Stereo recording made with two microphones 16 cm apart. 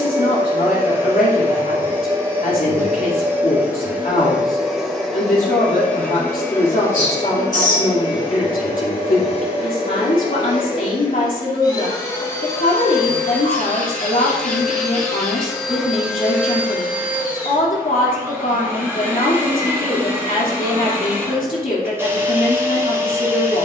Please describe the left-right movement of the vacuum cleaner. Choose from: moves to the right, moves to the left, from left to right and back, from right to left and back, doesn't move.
from right to left and back.